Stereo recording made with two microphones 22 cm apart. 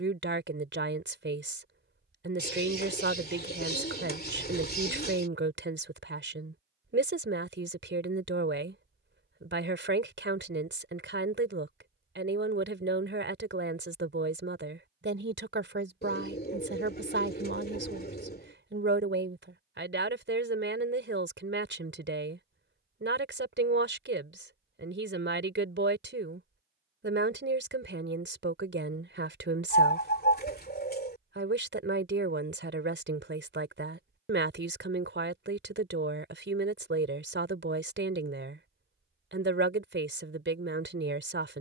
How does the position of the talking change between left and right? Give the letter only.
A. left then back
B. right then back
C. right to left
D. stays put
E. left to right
D.